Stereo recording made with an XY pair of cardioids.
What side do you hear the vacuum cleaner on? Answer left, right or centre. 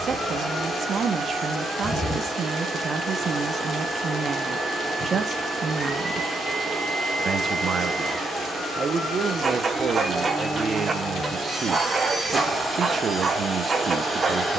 centre.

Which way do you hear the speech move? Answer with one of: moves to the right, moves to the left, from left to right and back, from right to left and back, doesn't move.
doesn't move.